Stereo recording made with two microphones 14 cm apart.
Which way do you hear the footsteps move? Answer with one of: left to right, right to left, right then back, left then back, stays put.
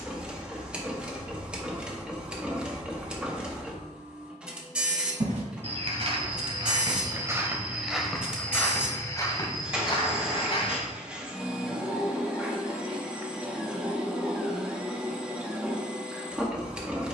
right to left.